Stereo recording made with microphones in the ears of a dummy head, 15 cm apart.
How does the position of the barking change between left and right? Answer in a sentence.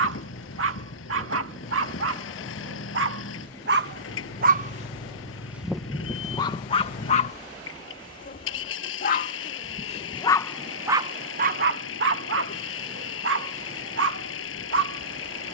In this clip you hear the barking go left and come back.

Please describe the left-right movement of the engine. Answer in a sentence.
You can hear the engine stay put.